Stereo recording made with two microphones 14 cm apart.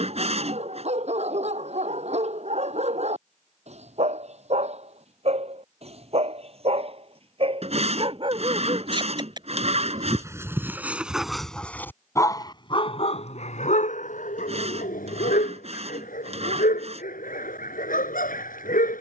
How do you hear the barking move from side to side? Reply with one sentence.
In this clip you hear the barking move from right to left.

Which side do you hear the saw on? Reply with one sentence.
In this clip you hear the saw on the right.